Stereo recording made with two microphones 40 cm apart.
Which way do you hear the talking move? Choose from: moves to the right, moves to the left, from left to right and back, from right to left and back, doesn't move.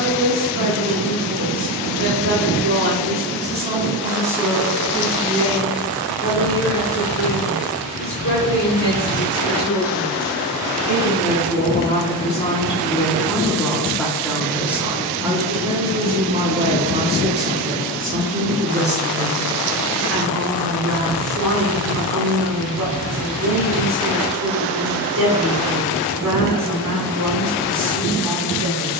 from right to left and back.